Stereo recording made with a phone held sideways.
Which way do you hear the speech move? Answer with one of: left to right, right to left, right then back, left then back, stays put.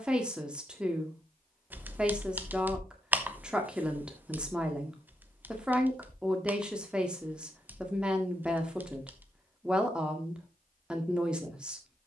stays put.